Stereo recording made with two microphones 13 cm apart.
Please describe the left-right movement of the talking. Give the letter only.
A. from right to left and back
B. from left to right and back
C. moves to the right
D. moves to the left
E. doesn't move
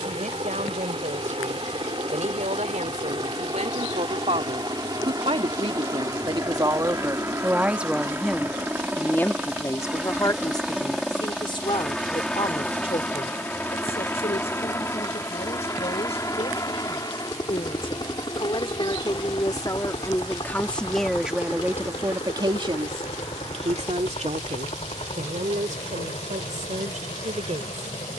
A.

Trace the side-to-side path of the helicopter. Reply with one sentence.
You can hear the helicopter travel towards the left.